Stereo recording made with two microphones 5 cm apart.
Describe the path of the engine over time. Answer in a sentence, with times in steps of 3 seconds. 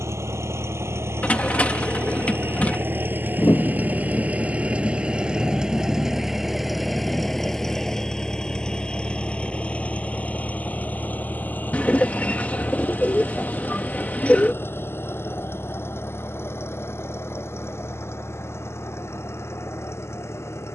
In this clip you hear the engine on the right from 0 s, in the centre from 6 s and on the left from 9 s.